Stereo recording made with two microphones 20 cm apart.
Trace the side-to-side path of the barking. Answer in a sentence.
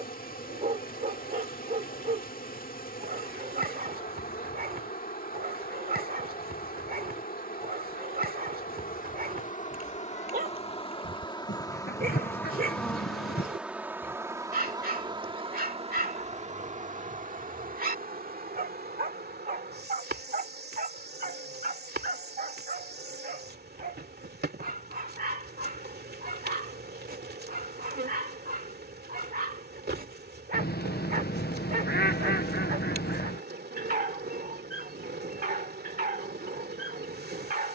In this clip you hear the barking stay in one place.